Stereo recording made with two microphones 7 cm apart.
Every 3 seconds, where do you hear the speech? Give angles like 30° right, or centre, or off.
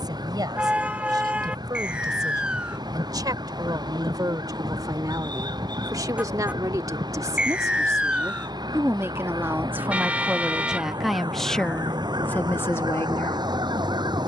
70° right, 60° right, 50° right, 10° right, 30° left.